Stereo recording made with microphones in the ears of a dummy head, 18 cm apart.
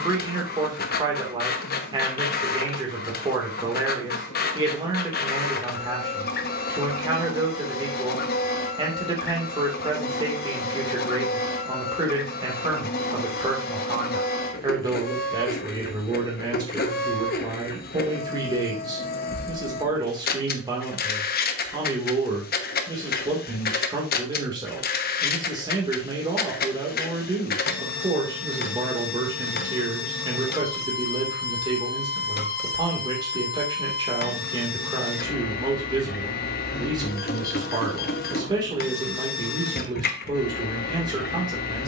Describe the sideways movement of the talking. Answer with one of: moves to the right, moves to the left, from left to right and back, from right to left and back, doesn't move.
doesn't move.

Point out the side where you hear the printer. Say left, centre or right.
left.